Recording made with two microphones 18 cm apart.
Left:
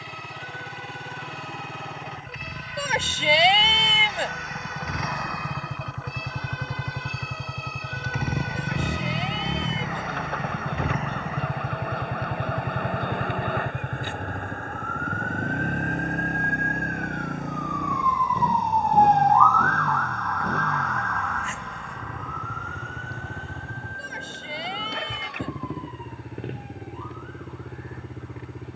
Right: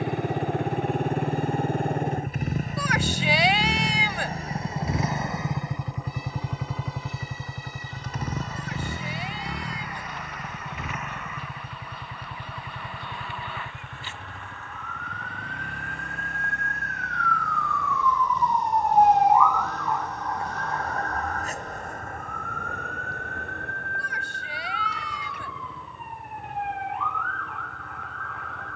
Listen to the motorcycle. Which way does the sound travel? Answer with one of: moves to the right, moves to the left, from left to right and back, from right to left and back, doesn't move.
moves to the left.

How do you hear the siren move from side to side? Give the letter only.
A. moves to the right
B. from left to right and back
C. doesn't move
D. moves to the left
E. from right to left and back
A.